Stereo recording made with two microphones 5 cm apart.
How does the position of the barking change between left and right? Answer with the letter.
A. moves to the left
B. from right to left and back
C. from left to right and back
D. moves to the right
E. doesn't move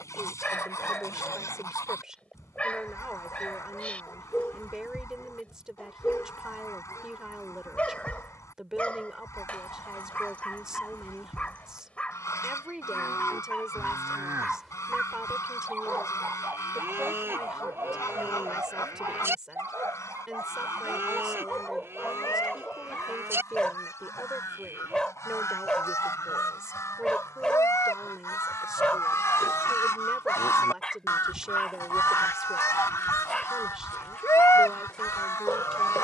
C.